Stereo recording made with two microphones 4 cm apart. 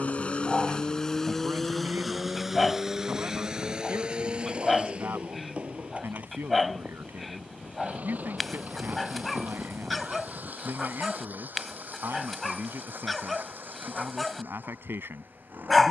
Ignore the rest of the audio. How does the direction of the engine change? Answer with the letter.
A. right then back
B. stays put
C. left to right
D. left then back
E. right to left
C.